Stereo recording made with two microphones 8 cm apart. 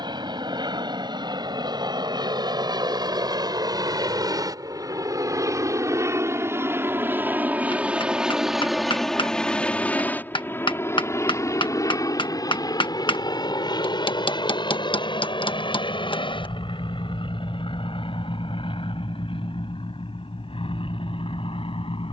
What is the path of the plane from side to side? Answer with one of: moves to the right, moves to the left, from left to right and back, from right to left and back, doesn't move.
moves to the left.